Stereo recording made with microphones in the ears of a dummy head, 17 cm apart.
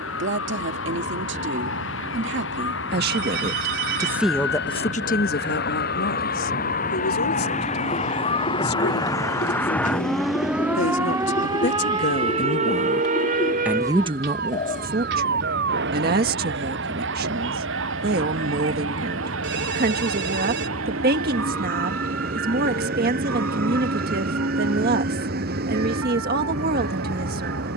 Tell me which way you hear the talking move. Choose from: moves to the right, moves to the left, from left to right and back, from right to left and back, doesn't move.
from right to left and back.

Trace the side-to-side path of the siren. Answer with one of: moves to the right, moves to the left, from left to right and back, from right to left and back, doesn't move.
moves to the right.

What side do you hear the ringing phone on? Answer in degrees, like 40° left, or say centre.
60° right.